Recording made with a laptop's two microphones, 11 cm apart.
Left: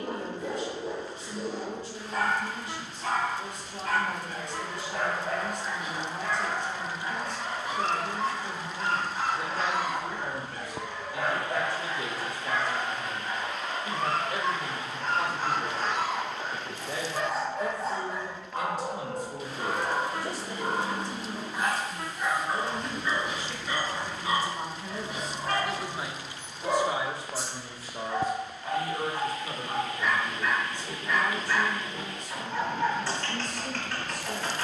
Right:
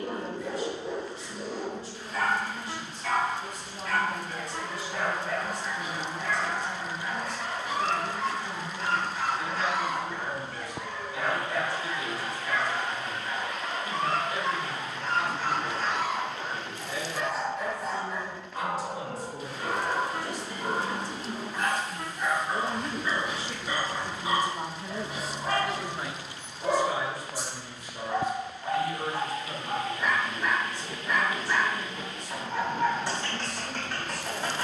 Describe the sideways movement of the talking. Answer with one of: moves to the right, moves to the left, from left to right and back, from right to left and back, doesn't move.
from left to right and back.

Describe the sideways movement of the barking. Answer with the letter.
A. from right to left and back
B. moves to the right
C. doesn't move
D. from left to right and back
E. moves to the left
B.